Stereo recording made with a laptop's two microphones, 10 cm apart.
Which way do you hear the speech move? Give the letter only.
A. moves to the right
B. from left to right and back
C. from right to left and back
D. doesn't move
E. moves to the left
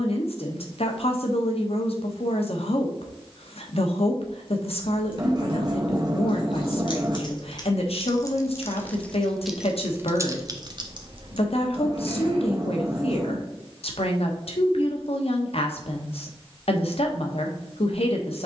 D.